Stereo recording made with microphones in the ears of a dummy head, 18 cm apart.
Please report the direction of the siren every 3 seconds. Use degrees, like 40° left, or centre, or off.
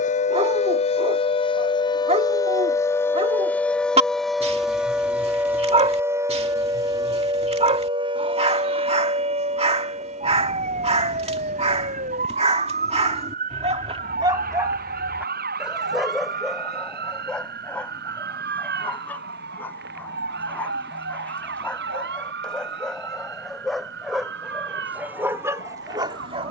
30° left, centre, 20° right, 40° right, 40° right, 50° right, 50° right, 60° right, 60° right.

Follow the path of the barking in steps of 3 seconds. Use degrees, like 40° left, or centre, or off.
30° right, 30° right, 30° right, 30° right, 30° right, centre, 10° left, centre, 10° right.